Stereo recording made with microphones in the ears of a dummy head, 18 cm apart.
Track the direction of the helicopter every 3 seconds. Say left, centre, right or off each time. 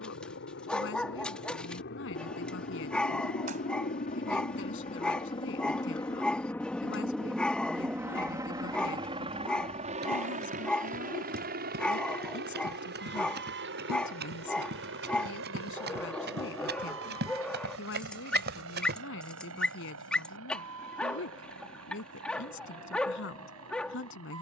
left, left, centre, right, right, right, right, right.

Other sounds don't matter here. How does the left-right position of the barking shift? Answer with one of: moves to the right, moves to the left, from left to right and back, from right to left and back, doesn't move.
doesn't move.